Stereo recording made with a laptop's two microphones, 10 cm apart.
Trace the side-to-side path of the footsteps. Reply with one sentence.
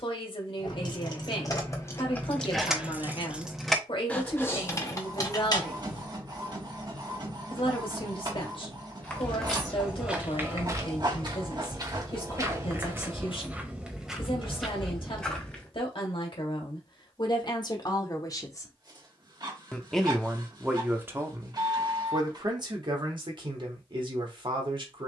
In this clip you hear the footsteps go right and come back.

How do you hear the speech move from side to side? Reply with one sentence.
In this clip you hear the speech move from left to right.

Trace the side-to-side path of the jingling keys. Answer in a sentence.
In this clip you hear the jingling keys go right and come back.